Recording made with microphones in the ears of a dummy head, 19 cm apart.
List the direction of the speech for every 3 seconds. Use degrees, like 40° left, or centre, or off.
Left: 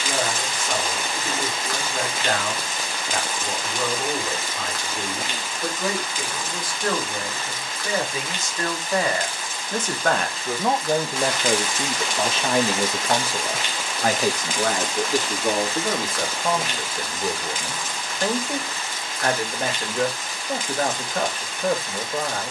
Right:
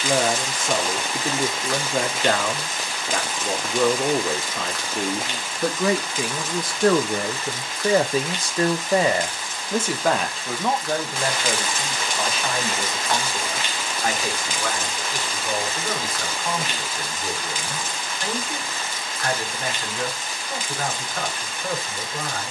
70° right, 70° right, 40° right, centre, 30° left, 40° left, 50° left, 50° left.